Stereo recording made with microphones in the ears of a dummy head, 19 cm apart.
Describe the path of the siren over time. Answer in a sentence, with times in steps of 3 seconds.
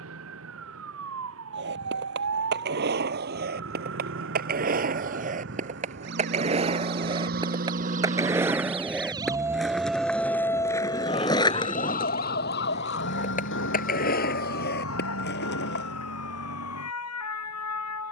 You can hear the siren on the right from 0 s, in the centre from 9 s and on the left from 12 s.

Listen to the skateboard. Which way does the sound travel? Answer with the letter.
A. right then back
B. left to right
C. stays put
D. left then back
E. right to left
E.